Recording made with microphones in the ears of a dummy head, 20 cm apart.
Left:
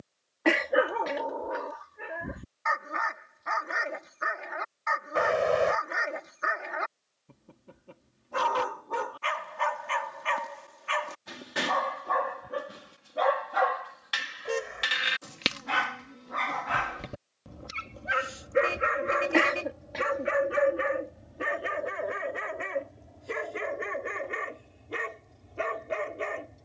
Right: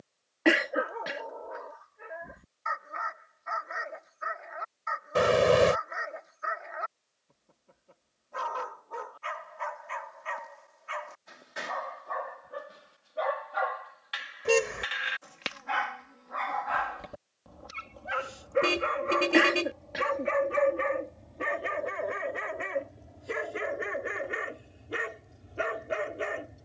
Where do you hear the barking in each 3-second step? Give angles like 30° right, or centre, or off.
80° left, 80° left, 80° left, 80° left, 70° left, 40° left, 20° left, centre, 10° right.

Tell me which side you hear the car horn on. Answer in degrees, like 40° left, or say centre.
50° right.